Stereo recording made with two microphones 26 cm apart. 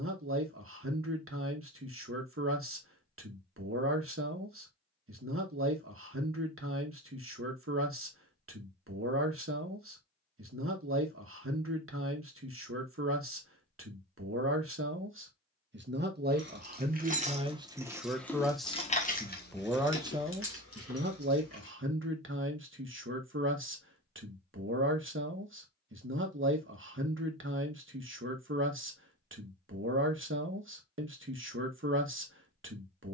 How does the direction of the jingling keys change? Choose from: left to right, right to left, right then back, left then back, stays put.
right to left.